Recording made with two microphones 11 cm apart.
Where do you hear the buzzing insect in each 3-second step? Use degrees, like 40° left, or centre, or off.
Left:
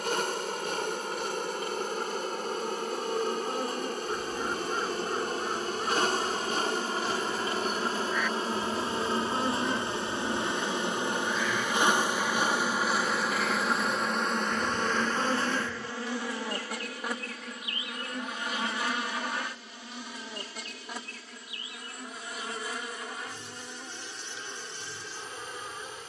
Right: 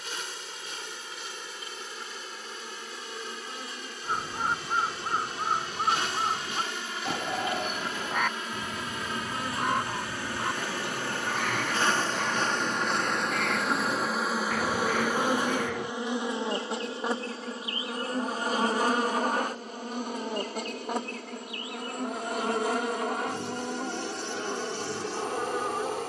50° left, 50° left, 40° left, 20° left, centre, 20° right, 40° right, 60° right, 70° right.